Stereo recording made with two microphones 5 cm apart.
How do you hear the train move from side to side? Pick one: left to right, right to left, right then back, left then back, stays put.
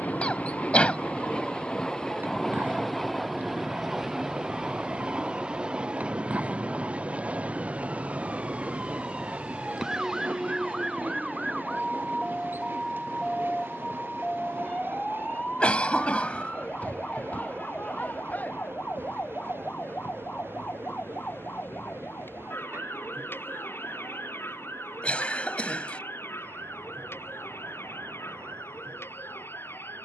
left to right.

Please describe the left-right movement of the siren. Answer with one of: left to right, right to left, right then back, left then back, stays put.
right to left.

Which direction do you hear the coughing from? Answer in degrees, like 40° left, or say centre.
30° left.